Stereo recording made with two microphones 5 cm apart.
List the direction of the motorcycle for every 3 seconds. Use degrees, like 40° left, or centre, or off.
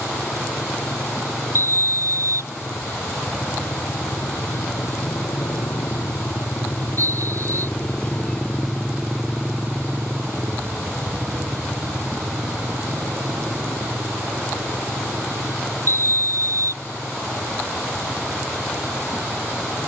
80° left, 70° left, 30° left, 40° right, 60° right, 70° right, 80° right.